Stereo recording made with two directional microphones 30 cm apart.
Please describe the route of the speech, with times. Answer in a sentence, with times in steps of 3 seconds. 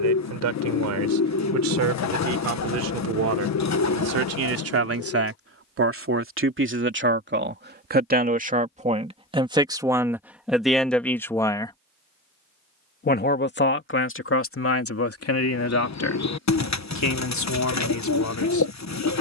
You can hear the speech on the right from 0 s, in the centre from 9 s and on the left from 12 s.